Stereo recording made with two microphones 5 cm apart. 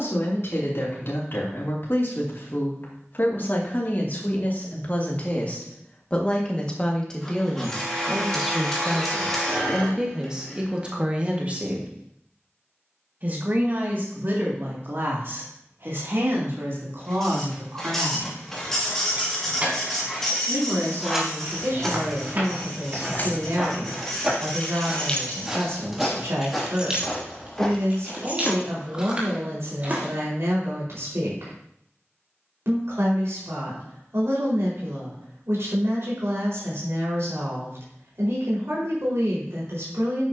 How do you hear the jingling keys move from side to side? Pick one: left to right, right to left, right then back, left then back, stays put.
left then back.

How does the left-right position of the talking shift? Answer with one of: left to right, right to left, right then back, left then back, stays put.
left to right.